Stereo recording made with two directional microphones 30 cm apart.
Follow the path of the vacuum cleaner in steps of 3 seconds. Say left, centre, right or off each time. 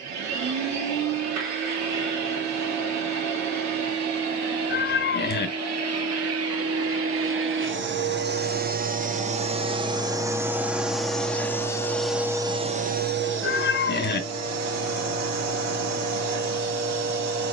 right, right, right, centre, right, right.